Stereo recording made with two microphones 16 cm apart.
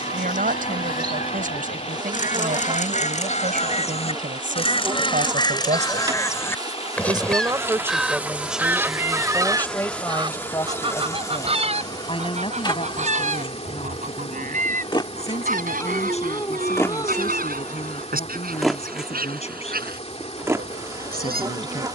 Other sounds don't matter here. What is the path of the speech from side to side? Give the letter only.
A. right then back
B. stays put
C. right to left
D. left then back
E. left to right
C.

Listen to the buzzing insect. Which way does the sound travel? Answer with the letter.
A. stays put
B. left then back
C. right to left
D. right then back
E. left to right
B.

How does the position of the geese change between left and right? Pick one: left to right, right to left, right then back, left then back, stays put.
left to right.